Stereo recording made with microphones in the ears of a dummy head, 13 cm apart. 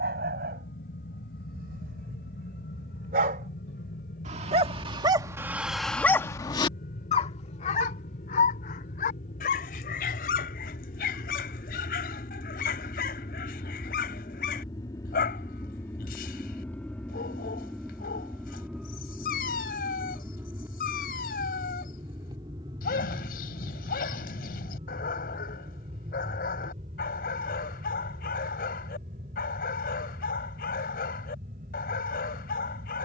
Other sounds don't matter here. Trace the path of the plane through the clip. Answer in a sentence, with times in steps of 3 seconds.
You can hear the plane on the left from 0 s, in the centre from 15 s and on the right from 21 s.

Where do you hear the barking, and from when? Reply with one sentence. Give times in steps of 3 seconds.
You can hear the barking on the right from 0 s and on the left from 6 s.